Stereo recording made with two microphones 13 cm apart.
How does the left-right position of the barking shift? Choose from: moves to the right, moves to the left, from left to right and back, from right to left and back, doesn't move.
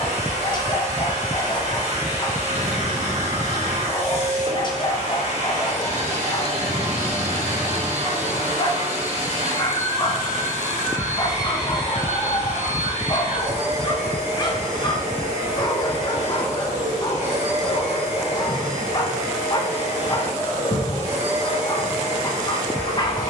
doesn't move.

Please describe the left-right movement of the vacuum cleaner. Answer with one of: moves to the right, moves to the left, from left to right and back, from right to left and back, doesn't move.
doesn't move.